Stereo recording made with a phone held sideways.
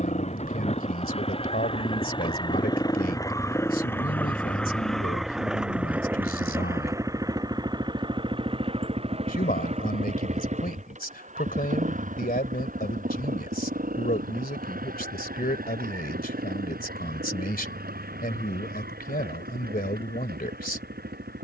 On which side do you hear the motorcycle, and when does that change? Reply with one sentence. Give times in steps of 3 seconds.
In this clip you hear the motorcycle on the left from 0 s, in the centre from 3 s and on the right from 6 s.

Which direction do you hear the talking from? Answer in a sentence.
You can hear the talking on the left.